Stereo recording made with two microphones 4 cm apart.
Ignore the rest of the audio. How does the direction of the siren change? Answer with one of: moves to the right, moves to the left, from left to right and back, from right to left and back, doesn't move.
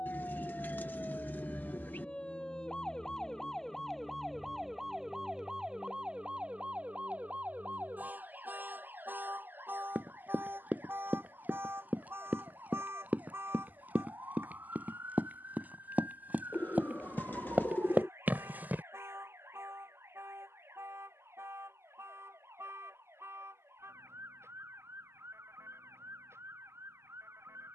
moves to the right.